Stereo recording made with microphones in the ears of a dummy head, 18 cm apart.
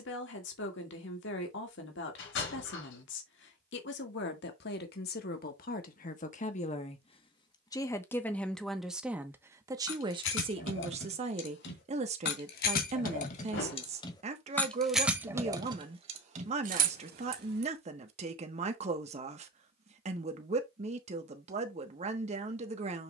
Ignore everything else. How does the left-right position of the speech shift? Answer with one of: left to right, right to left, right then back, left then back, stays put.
left to right.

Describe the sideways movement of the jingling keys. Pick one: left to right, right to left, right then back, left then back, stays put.
left to right.